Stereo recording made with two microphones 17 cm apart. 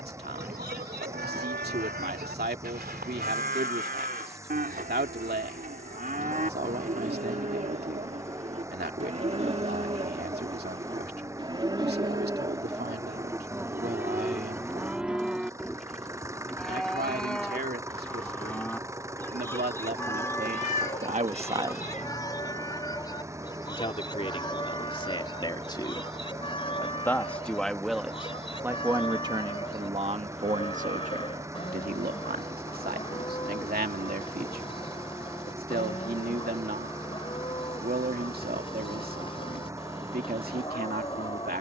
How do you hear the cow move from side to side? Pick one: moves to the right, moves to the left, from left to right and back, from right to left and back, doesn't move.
moves to the left.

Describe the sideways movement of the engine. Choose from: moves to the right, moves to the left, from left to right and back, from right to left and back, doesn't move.
doesn't move.